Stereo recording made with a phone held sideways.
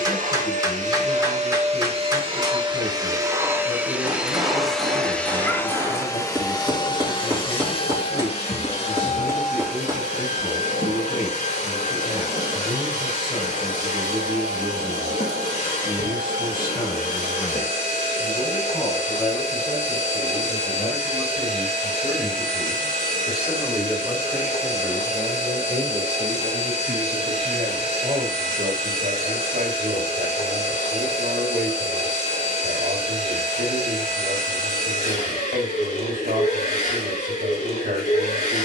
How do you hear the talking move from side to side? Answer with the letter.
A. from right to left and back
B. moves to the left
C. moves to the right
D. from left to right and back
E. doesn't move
C.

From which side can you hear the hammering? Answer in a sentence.
In this clip you hear the hammering on the right.